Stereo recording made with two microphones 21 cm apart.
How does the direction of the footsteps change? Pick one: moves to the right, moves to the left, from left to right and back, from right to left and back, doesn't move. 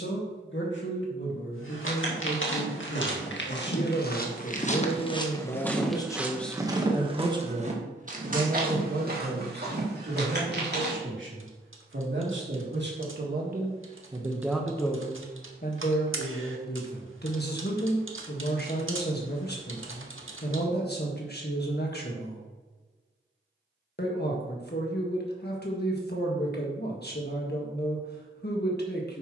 moves to the right.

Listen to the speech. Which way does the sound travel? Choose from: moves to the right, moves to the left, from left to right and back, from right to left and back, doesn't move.
from left to right and back.